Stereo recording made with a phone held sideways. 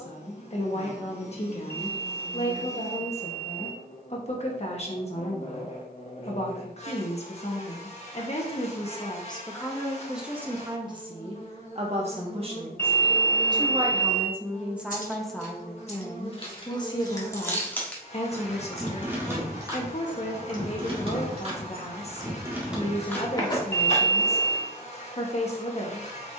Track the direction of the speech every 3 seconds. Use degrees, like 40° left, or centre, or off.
40° left, 40° left, 40° left, 10° right, 20° right, 20° left, 40° left, 40° left, 40° left.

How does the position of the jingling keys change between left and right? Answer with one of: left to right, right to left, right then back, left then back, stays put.
right then back.